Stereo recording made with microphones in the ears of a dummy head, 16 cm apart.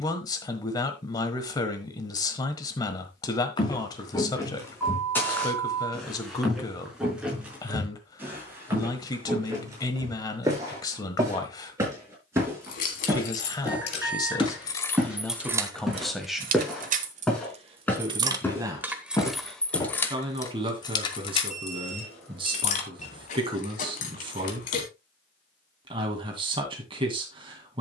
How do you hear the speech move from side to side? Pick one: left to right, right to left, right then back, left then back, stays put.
left to right.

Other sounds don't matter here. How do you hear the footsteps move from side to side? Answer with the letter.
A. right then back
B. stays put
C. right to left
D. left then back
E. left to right
A.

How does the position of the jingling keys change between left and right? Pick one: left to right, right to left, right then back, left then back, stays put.
right then back.